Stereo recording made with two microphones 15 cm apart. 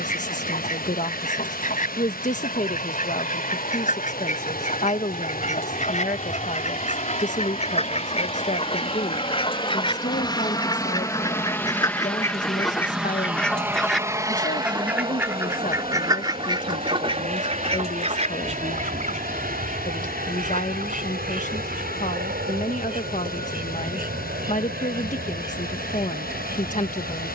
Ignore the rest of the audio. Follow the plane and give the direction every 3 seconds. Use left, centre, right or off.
left, left, left, left, centre, right, right, right, right.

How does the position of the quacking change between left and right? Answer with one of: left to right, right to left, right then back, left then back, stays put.
left to right.